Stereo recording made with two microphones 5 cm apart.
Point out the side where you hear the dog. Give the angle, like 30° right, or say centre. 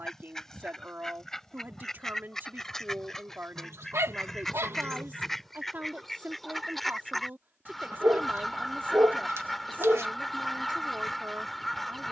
80° right.